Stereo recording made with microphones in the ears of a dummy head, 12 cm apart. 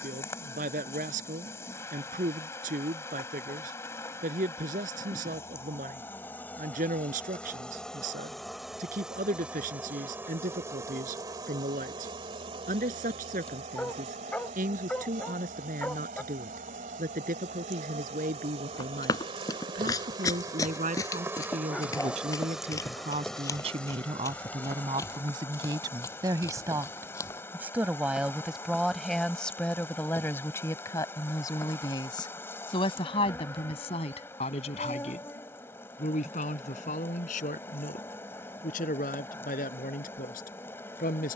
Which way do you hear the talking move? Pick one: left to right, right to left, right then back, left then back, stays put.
right to left.